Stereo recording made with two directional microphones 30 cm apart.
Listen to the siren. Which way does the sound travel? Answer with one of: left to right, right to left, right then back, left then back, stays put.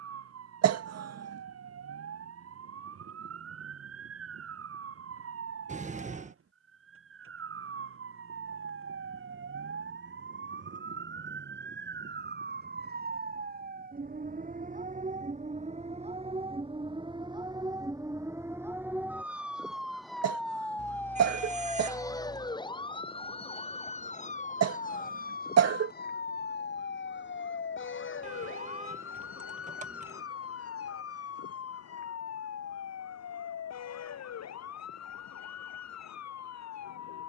right to left.